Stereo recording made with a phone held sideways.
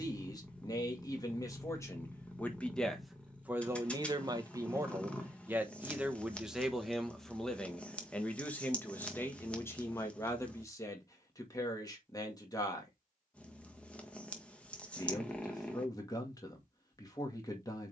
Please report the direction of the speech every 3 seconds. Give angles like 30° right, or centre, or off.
20° left, 20° right, centre, 20° left, 20° left, 20° left.